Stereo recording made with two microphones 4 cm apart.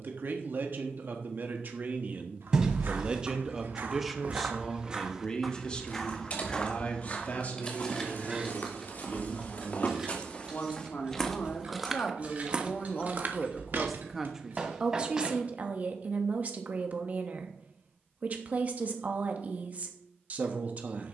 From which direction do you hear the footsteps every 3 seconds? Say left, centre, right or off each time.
right, right, left, left, right, off, off.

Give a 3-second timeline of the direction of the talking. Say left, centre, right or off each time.
right, centre, left, left, centre, right, right.